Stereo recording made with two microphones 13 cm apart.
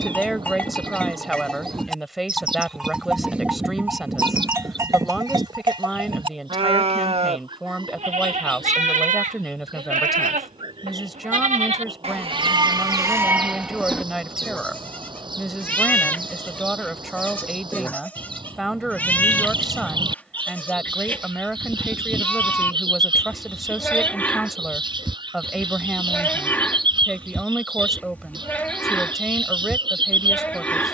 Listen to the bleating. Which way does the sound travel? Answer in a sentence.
You can hear the bleating move from left to right and back again.